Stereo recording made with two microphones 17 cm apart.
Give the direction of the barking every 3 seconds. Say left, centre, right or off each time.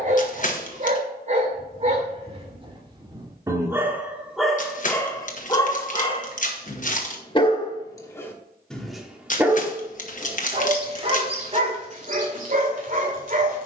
right, centre, left, right, right.